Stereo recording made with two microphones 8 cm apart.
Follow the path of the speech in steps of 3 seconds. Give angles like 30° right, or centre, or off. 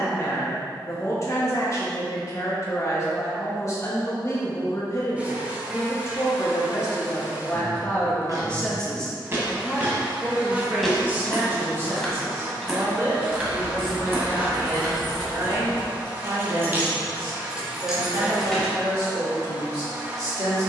40° left, 40° left, 30° left, 20° right, 40° right, 50° right, 50° right.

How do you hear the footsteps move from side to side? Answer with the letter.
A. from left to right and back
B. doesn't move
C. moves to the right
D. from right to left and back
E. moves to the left
D.